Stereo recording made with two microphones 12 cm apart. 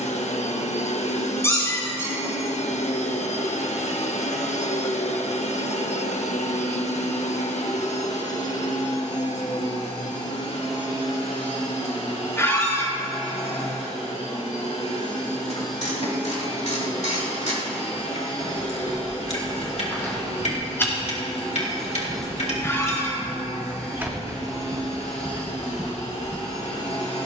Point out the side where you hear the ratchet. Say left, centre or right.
left.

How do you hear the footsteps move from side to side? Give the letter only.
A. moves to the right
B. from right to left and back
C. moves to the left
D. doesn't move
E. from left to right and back
A.